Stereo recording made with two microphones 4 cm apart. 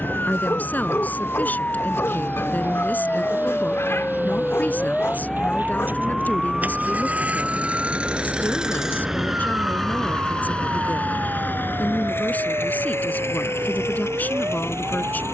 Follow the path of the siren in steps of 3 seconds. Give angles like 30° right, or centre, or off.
40° left, 20° left, 20° right, 40° right, 60° right.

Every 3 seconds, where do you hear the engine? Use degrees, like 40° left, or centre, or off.
60° right, 50° right, 30° right, 20° left, 70° left.